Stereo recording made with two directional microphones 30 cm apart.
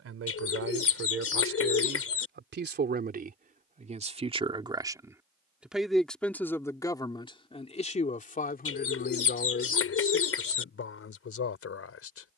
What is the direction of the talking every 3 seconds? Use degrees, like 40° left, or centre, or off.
40° right, 20° right, 20° left, 40° left.